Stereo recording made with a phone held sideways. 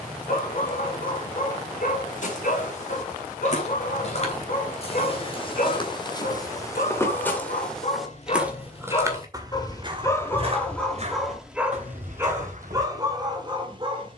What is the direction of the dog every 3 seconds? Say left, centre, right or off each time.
left, left, left, centre, right.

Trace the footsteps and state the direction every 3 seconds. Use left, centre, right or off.
left, left, centre, right, right.